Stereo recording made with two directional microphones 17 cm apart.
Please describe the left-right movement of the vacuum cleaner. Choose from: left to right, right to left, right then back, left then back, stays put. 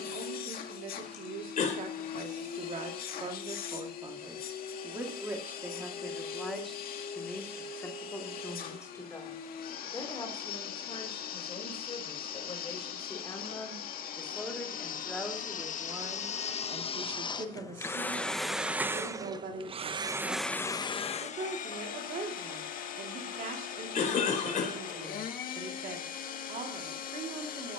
right then back.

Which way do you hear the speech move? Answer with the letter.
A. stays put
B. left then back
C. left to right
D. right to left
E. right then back
B.